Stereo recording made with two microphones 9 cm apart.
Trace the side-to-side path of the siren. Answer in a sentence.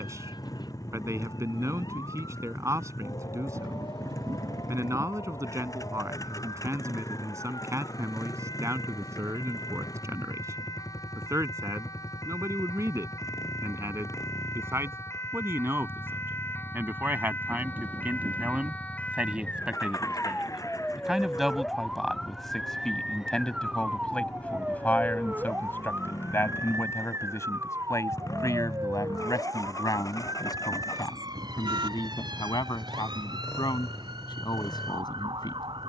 You can hear the siren go from the left side to the right.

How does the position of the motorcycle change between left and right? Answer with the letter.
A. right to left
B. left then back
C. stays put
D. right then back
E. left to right
C.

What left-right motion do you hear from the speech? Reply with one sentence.
You can hear the speech travel towards the left.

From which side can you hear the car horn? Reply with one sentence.
You can hear the car horn on the right.